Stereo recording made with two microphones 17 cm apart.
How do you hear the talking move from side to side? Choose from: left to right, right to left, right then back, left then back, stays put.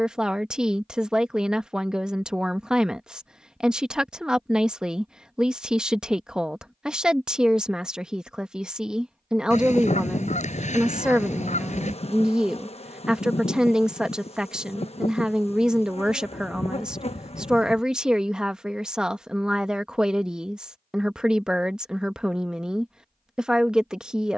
stays put.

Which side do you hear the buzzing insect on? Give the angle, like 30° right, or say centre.
40° left.